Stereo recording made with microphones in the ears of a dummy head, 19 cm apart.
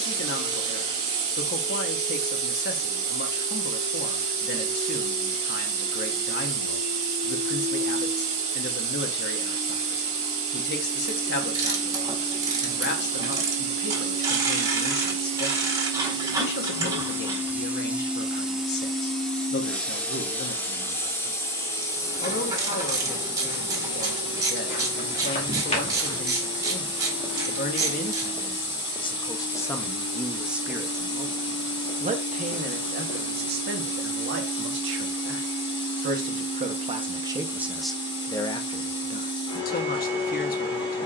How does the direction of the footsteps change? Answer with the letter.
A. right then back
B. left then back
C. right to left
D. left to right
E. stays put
A.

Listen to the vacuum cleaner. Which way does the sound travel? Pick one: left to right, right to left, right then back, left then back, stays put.
right to left.